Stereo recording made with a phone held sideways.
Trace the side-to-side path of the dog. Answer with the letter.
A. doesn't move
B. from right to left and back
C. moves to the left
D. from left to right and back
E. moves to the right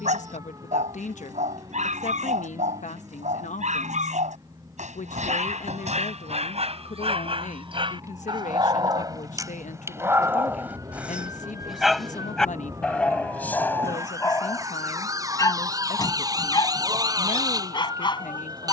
C.